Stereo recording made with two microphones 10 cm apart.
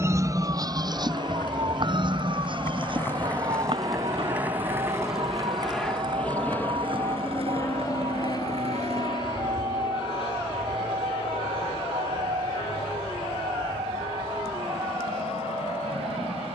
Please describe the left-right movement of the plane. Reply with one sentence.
In this clip you hear the plane travel towards the left.